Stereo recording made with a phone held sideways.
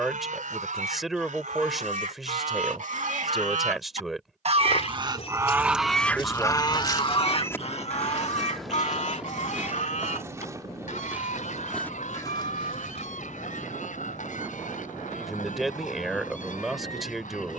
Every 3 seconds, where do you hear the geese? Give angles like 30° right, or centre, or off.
80° right, 40° right, 40° left, 70° left, 80° left, 80° left.